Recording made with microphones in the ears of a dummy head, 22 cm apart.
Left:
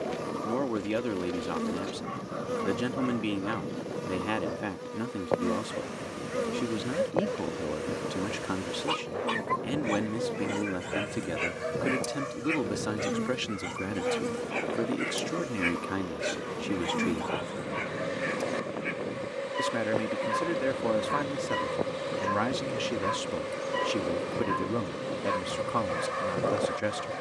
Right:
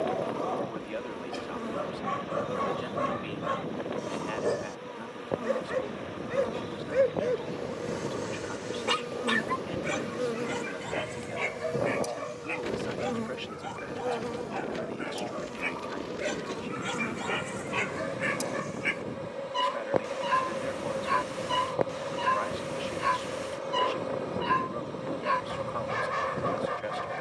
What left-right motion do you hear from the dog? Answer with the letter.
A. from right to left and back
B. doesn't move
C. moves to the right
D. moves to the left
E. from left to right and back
A.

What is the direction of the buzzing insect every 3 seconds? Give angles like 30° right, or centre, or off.
30° left, 30° left, 10° left, 10° right, 20° left, 30° left, 30° left, 30° left, 30° left.